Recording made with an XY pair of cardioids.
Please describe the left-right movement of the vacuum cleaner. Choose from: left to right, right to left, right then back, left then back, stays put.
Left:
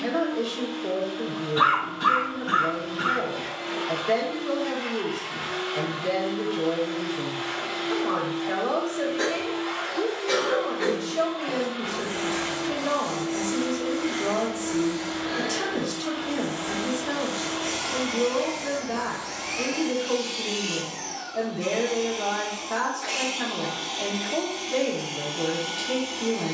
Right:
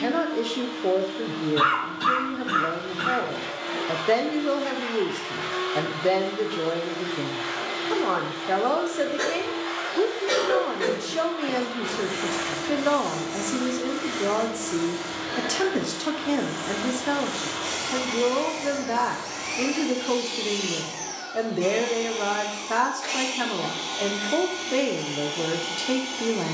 stays put.